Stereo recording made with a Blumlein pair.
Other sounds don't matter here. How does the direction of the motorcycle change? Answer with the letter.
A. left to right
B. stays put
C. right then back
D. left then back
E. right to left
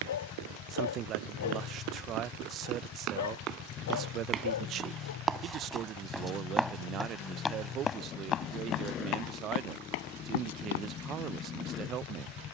B.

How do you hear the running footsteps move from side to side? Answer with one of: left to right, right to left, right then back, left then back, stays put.
right to left.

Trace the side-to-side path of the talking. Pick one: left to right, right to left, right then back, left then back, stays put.
stays put.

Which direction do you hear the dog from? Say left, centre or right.
left.